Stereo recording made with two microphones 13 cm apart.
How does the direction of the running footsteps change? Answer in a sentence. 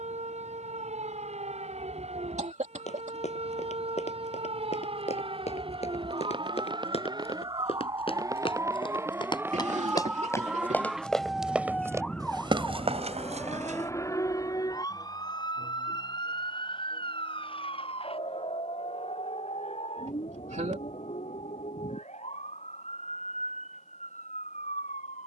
In this clip you hear the running footsteps move to the right.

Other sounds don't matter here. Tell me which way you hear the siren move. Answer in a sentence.
In this clip you hear the siren move to the left.